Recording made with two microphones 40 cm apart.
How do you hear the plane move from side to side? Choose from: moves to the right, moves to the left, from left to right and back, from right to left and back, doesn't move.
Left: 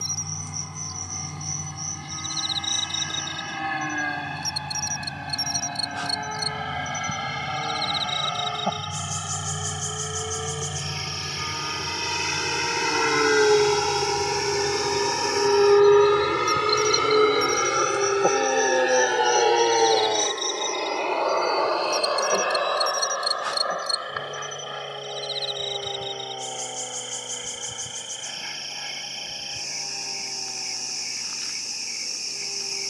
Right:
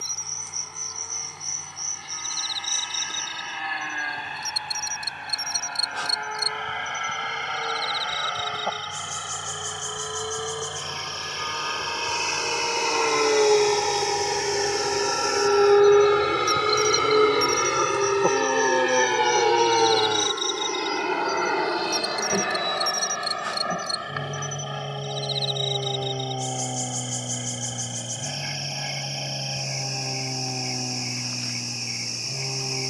moves to the right.